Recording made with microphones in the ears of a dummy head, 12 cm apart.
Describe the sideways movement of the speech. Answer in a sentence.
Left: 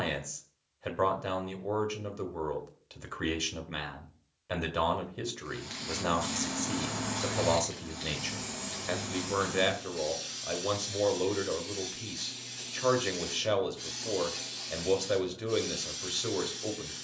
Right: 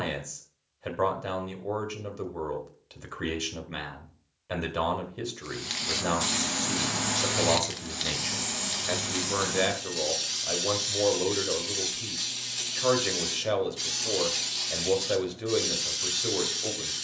In this clip you hear the speech stay put.